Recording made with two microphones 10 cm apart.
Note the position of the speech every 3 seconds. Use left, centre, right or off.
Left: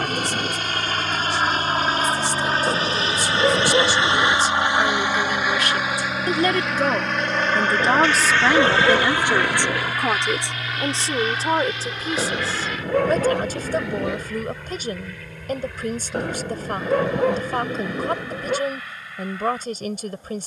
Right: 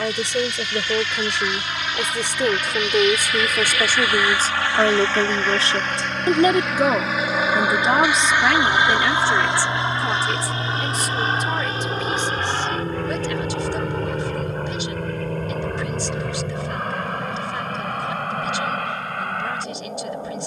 right, right, centre, left, left, left, left.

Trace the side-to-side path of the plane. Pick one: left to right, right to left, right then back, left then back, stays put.
left to right.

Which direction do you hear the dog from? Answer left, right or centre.
left.